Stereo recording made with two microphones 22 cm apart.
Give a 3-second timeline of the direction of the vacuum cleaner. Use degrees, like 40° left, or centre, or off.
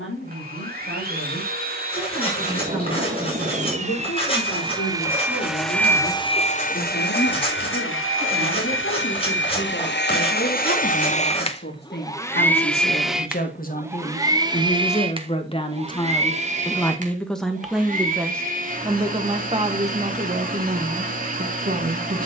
40° right, 20° right, 60° left, 50° left, 10° right, 30° right, 40° right, 40° right.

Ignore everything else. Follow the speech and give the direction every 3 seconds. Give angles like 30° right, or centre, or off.
70° left, 70° left, 60° left, 60° left, 40° left, 10° left, 30° right, 50° right.